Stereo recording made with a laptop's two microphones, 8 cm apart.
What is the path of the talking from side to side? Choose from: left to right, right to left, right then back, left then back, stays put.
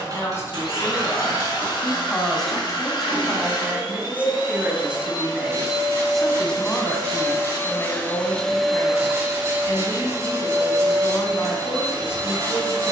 right then back.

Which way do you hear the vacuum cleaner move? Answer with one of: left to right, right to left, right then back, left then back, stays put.
left to right.